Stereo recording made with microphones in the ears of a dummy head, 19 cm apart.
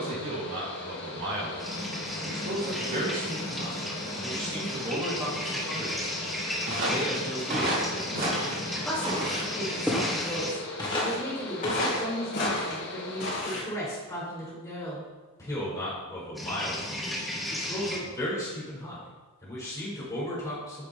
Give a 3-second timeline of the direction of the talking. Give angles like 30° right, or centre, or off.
60° right, 30° right, centre, 10° left, 20° left, 20° left, 20° left.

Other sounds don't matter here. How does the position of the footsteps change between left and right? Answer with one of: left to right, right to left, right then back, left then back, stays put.
right to left.